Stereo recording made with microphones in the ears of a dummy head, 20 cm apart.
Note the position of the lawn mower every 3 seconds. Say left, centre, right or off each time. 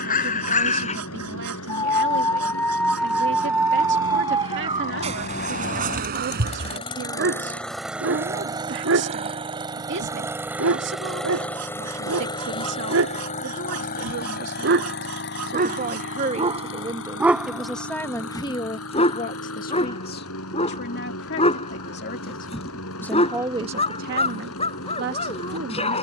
left, left, centre, centre, left, left, left, left, left.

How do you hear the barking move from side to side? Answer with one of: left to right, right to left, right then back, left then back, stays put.
right then back.